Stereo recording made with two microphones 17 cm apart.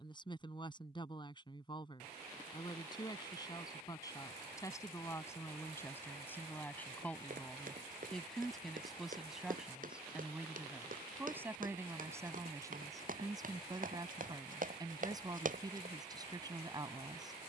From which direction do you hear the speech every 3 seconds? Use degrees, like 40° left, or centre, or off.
30° left, 20° left, 10° left, 10° right, 20° right, 20° right.